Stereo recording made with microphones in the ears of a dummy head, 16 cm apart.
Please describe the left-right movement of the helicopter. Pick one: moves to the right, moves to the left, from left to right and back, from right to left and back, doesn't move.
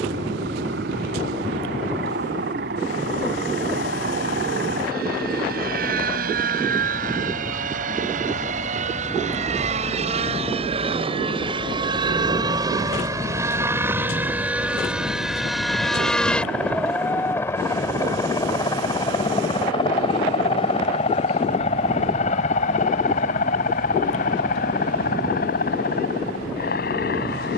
moves to the left.